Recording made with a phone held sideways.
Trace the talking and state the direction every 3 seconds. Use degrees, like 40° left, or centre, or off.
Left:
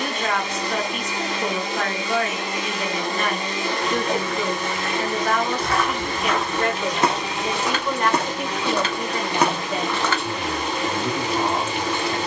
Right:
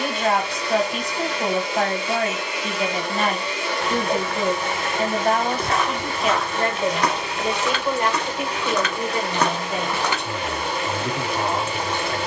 30° right, 30° right, 20° right, centre.